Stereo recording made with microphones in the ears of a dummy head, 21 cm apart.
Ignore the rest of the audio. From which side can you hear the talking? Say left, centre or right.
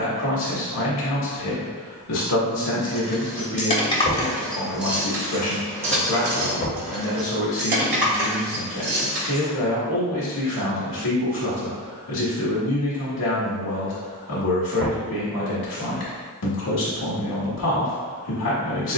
left.